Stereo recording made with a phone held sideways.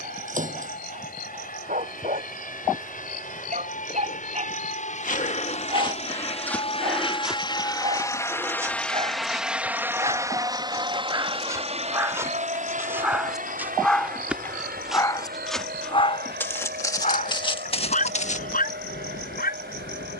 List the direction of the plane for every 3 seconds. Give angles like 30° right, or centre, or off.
70° left, 60° left, 30° left, 20° right, 50° right, 70° right, 70° right.